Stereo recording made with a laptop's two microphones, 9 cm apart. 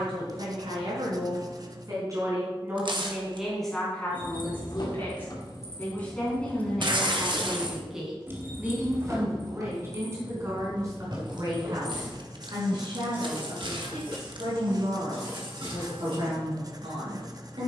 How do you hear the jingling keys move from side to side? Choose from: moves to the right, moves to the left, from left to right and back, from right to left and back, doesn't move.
moves to the right.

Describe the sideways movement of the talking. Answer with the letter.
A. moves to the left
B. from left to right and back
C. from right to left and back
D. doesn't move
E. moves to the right
C.